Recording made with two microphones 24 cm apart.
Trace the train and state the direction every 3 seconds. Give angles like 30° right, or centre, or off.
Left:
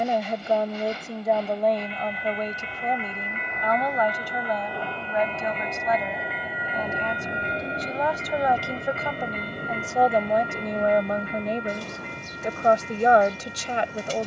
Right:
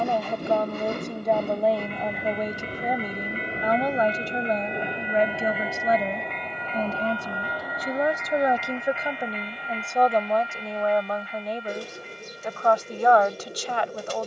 50° right, 20° right, 20° left, 50° left, 60° left.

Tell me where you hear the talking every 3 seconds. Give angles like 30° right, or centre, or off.
centre, 30° right, 30° right, 10° left, 20° left.